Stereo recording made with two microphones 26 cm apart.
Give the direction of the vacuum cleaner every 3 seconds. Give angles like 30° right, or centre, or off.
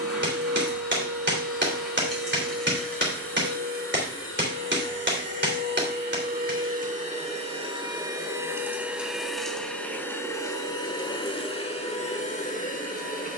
60° right, 50° right, 20° right, 10° left, 30° left.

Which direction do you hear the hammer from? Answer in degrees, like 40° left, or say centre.
50° right.